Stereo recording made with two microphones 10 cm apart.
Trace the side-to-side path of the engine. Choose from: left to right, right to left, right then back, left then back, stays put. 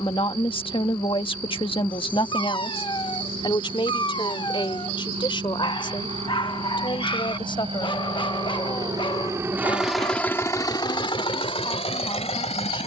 right to left.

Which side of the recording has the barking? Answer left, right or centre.
left.